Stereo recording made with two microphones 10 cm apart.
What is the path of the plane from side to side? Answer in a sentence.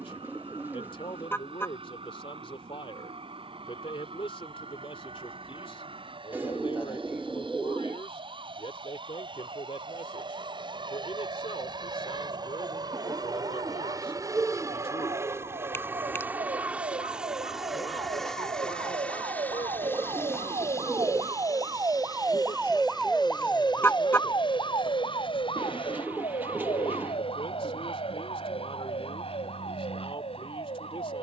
You can hear the plane travel towards the left.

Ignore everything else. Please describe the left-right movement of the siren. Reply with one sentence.
You can hear the siren travel towards the left.